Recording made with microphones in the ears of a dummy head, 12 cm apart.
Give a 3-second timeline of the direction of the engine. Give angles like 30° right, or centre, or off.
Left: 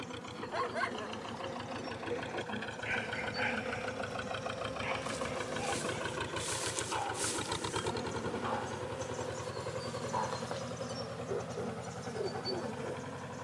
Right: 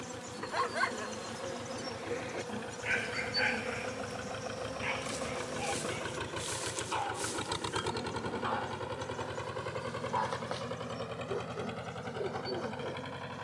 40° left, 30° left, 10° right, 50° right, 70° right.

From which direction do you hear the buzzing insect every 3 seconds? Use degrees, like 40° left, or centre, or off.
50° right, 20° right, 10° left, 40° left, 50° left.